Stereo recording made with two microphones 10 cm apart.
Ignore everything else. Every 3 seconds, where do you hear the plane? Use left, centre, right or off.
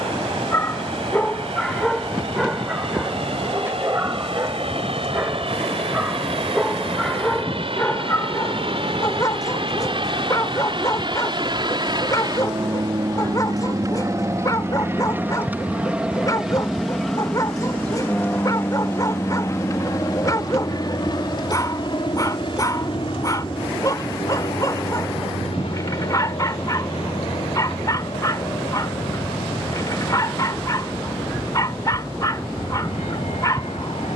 right, right, right, right, right, centre, left, left, left, left, left, left.